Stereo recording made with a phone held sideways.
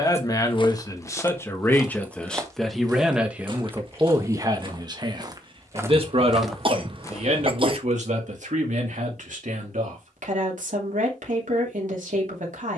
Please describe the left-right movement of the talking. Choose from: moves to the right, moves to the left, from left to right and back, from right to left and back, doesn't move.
moves to the right.